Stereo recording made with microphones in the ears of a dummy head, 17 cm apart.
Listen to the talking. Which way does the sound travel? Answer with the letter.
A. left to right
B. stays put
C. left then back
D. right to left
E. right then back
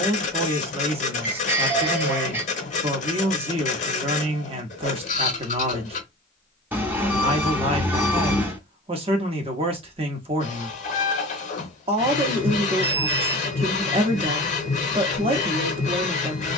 B.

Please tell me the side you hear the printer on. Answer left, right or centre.
left.